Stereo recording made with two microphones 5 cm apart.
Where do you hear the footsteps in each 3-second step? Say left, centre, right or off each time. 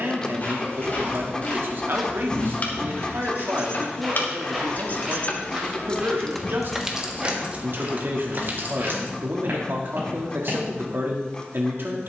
left, centre, right, right.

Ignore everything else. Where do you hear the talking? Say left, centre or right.
right.